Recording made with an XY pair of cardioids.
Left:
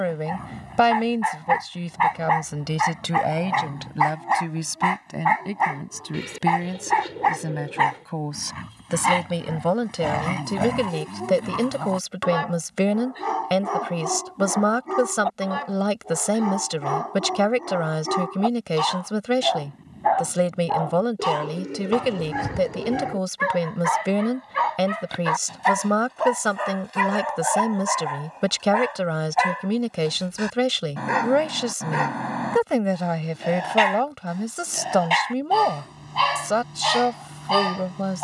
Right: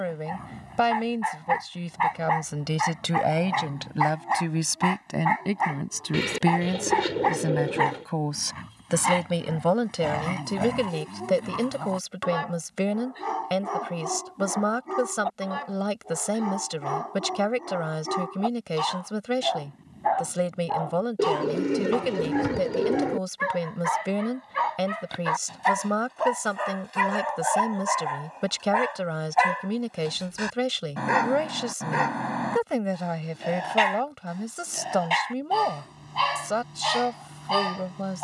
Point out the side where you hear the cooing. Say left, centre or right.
right.